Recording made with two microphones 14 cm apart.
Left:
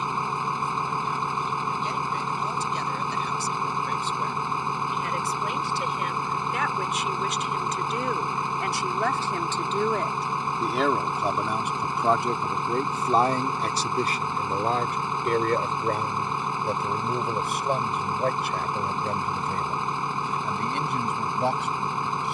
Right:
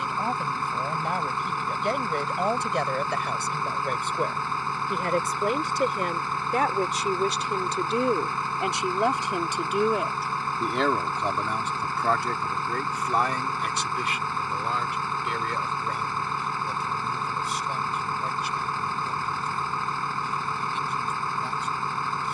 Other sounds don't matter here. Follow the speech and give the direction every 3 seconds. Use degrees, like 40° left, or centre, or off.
60° right, 50° right, 30° right, centre, 30° left, 50° left, 60° left, 70° left.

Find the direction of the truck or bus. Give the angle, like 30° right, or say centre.
20° left.